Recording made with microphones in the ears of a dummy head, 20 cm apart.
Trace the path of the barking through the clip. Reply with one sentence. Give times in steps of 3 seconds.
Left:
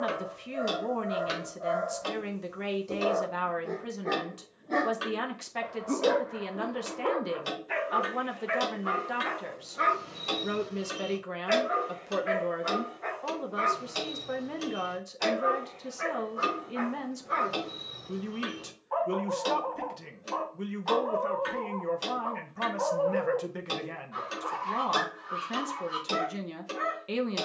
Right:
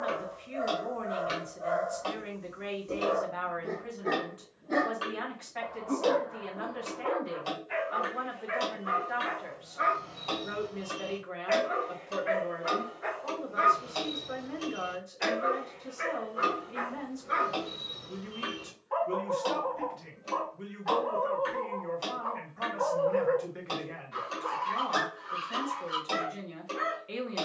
You can hear the barking on the right from 0 s, in the centre from 3 s, on the left from 6 s, in the centre from 12 s and on the right from 15 s.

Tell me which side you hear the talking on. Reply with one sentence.
You can hear the talking on the left.